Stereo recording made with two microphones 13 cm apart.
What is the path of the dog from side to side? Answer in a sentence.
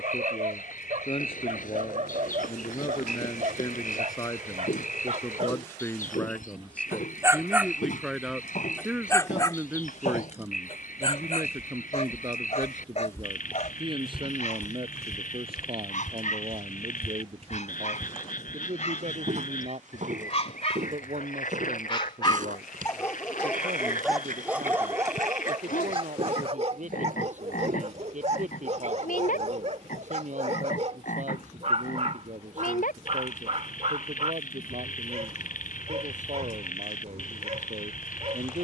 You can hear the dog go left and come back.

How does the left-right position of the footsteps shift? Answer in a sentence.
You can hear the footsteps go from the left side to the right.